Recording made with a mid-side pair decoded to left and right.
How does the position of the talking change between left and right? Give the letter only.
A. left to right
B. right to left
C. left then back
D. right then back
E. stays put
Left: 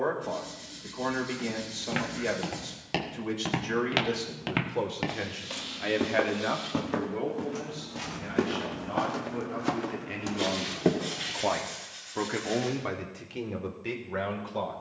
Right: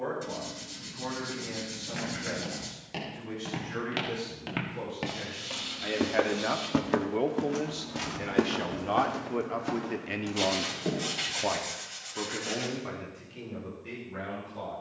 D.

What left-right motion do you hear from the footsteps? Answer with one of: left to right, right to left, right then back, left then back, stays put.
right then back.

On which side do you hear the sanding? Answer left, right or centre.
right.